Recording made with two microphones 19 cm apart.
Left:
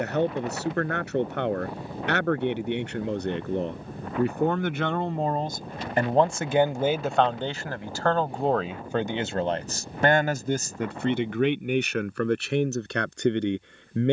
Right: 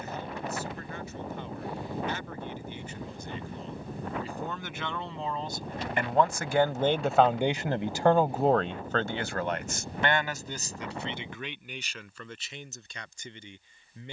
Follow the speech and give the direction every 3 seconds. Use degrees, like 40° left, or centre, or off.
80° left, 60° left, centre, 50° left, 70° left.